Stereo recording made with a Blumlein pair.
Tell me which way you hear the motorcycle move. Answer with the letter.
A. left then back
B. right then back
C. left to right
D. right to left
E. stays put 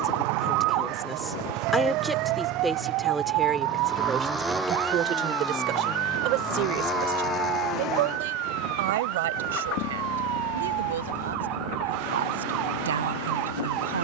D.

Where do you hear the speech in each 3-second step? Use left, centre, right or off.
centre, right, right, right, right.